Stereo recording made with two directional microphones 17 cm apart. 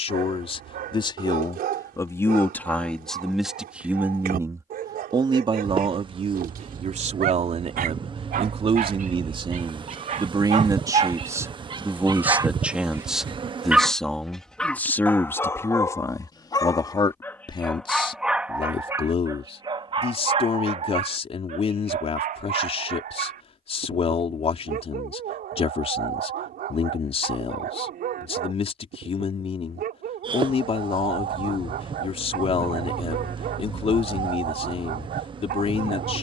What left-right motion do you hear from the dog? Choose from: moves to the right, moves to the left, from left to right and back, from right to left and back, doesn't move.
from right to left and back.